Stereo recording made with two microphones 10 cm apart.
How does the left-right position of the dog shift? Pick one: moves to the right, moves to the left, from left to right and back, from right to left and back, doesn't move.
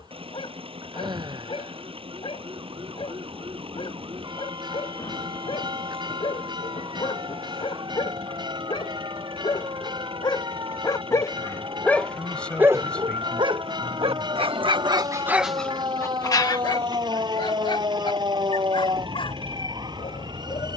from left to right and back.